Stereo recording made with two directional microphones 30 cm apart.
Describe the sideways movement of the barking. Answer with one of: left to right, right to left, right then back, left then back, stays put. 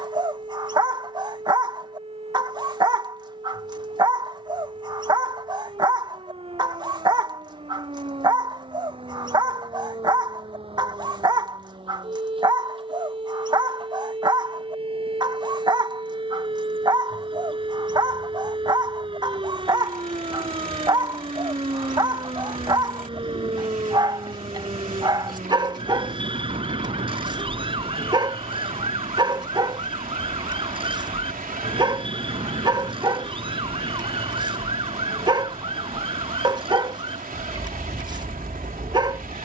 stays put.